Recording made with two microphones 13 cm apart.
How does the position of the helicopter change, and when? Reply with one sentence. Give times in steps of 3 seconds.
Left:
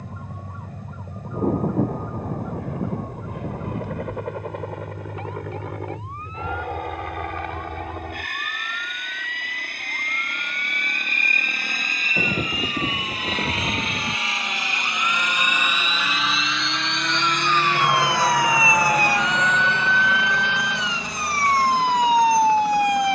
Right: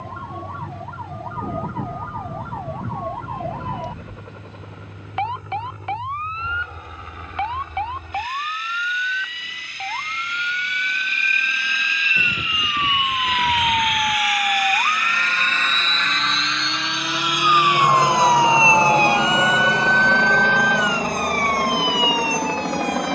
In this clip you hear the helicopter on the left from 0 s, in the centre from 15 s and on the right from 18 s.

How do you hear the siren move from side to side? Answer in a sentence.
In this clip you hear the siren move from right to left.